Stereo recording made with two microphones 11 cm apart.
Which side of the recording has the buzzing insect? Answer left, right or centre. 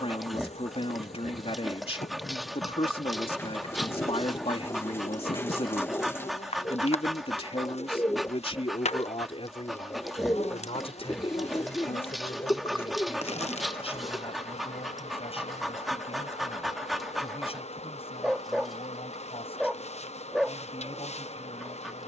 left.